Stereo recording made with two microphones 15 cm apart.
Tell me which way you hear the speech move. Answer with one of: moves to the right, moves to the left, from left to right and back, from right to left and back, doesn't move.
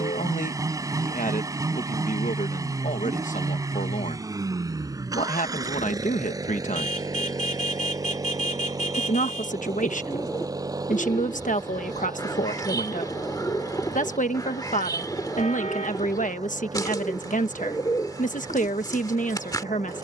doesn't move.